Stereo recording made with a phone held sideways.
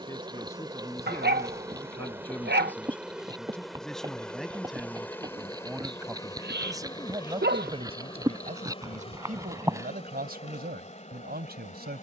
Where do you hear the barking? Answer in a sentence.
You can hear the barking on the right.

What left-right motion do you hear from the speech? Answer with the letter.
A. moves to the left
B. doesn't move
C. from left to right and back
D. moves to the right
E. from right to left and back
D.